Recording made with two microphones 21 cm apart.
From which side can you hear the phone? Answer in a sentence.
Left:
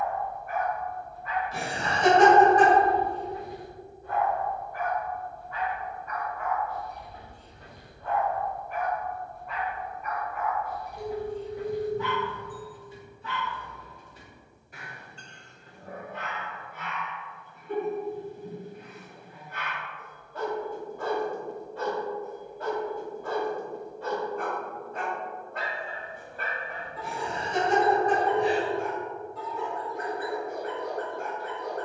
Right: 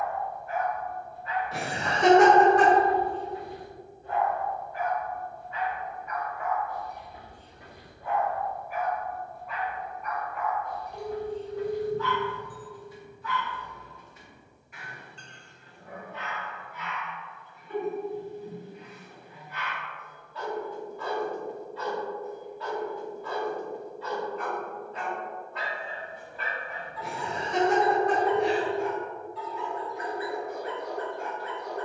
In this clip you hear the phone on the right.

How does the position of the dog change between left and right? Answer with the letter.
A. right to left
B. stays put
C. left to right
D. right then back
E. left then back
A.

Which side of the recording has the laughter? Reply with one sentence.
In this clip you hear the laughter on the right.